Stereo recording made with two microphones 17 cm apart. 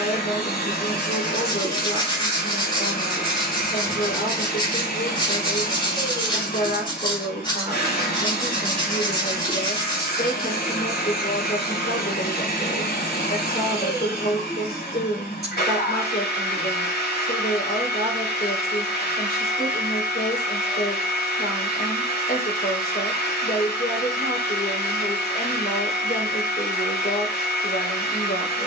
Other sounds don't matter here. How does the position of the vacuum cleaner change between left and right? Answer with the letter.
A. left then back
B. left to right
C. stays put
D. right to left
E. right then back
C.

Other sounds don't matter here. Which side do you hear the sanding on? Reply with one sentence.
You can hear the sanding on the left.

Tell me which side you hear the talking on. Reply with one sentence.
In this clip you hear the talking on the left.